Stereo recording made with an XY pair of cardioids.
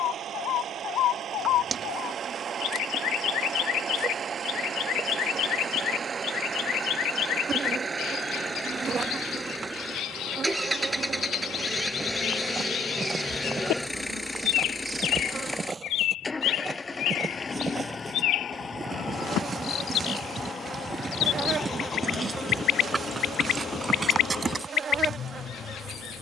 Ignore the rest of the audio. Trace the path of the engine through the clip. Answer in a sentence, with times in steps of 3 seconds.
You can hear the engine on the right from 0 s, in the centre from 9 s and on the left from 15 s.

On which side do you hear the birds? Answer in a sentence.
You can hear the birds on the left.